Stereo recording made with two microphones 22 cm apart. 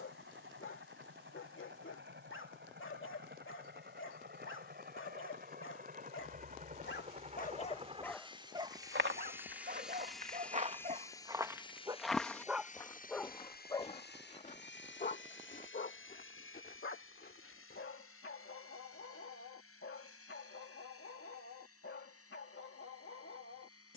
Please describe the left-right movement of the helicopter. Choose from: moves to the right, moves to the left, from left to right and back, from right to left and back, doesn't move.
moves to the left.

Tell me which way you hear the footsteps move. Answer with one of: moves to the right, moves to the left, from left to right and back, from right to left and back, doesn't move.
moves to the left.